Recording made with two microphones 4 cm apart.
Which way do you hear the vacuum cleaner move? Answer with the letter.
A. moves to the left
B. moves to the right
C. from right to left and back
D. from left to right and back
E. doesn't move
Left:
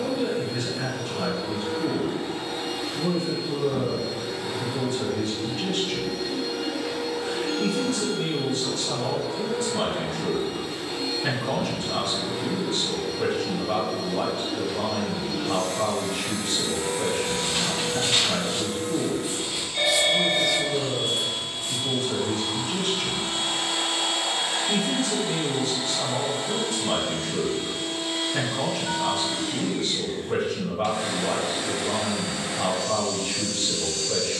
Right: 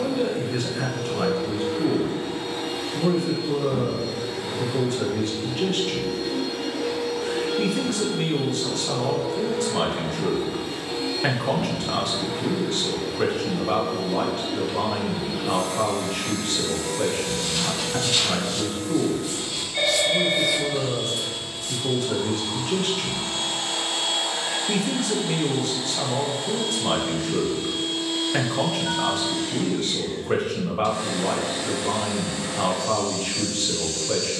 A.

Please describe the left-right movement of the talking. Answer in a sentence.
In this clip you hear the talking stay in one place.